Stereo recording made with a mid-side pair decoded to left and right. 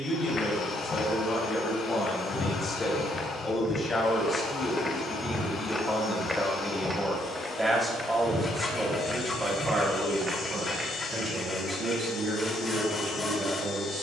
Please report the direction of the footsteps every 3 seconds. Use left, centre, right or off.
left, left, centre, right, off.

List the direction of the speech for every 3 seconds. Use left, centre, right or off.
left, left, centre, right, right.